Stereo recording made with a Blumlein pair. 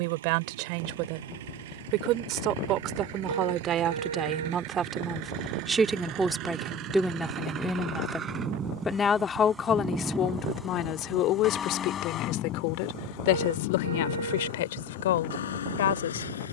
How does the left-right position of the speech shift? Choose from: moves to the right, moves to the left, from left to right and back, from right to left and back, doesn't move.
moves to the left.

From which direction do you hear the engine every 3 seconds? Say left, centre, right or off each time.
right, right, right, centre, left, left.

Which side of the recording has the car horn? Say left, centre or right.
right.